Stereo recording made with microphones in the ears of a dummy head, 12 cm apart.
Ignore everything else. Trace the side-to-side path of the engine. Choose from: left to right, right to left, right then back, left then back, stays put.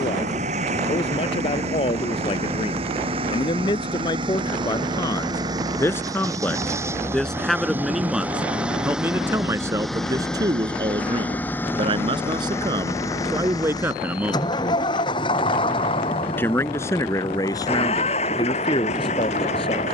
right to left.